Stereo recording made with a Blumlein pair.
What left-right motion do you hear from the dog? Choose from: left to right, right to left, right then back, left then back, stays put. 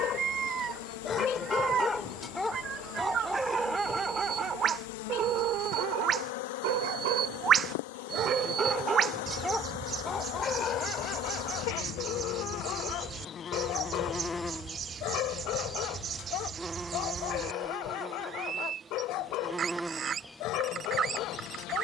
right then back.